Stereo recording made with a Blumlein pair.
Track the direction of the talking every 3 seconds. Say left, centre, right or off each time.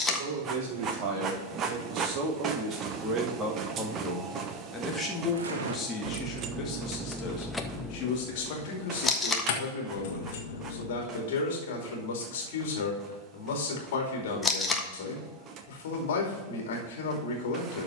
right, centre, left, left, left, left.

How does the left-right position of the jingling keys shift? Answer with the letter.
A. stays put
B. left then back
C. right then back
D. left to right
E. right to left
E.